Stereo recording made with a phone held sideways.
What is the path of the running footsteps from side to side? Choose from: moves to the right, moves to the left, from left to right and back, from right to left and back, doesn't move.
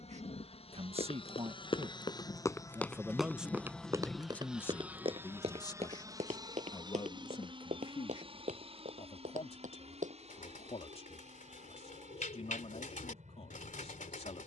moves to the right.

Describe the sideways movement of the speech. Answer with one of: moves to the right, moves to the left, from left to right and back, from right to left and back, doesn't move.
moves to the left.